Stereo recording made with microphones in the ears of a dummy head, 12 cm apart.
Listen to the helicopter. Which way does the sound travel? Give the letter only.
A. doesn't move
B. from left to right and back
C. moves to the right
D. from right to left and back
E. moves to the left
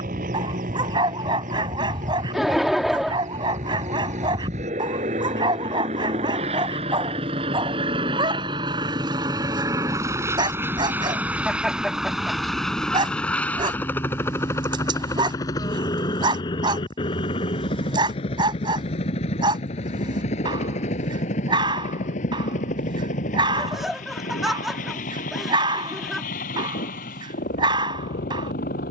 E.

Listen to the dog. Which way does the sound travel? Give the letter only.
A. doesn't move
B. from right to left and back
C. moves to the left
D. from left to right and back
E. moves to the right
A.